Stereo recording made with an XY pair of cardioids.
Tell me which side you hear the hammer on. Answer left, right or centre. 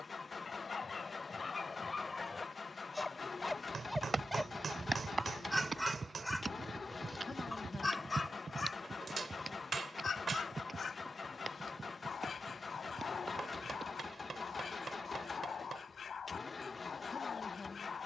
right.